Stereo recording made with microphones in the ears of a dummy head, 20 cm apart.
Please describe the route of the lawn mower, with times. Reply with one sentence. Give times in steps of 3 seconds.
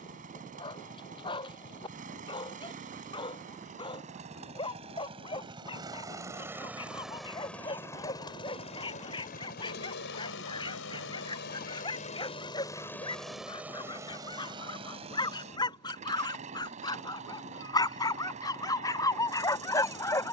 In this clip you hear the lawn mower on the right from 0 s, in the centre from 6 s, on the left from 9 s, in the centre from 12 s and on the right from 15 s.